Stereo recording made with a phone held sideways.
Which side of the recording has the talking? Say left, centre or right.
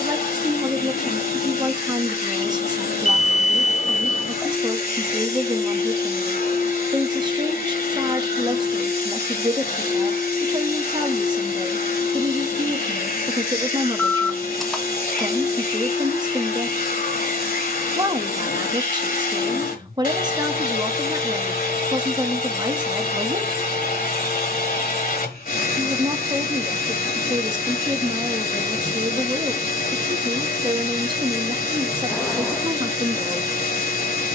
right.